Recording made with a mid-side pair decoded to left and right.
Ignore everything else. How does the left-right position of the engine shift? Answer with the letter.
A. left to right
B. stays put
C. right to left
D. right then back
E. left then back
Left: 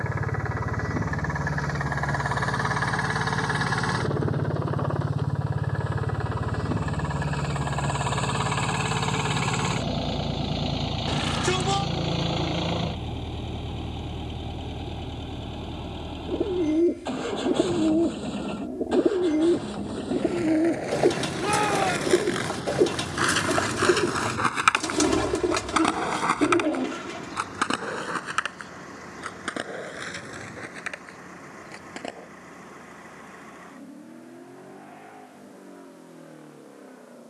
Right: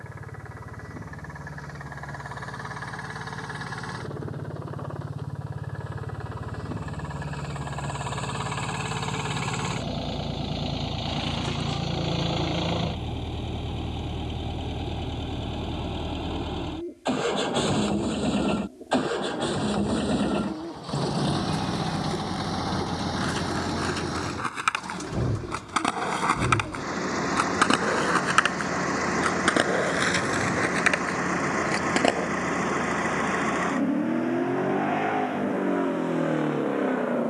A.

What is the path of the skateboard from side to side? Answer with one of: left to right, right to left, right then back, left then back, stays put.
left to right.